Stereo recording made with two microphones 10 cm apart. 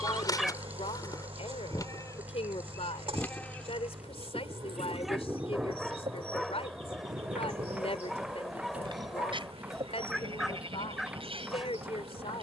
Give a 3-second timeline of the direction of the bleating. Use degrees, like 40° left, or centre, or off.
40° left, 10° right, 40° right, 60° right.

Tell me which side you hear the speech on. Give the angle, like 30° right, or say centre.
80° left.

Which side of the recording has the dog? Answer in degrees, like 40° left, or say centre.
centre.